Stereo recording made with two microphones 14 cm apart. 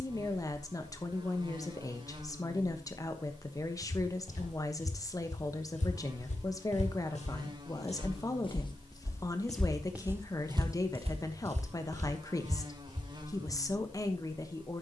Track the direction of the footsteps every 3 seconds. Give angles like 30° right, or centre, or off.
off, 70° left, 50° left, 20° right, 70° right.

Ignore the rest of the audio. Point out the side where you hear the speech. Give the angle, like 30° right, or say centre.
30° left.